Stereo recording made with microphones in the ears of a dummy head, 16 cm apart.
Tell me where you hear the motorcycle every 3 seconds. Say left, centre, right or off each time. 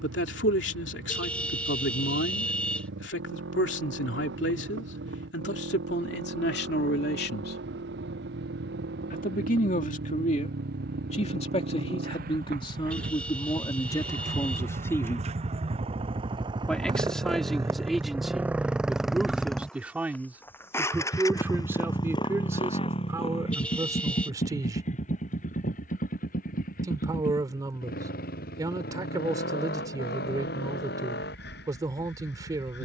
right, right, right, right, right, right, centre, left, left, left, left.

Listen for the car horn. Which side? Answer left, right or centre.
centre.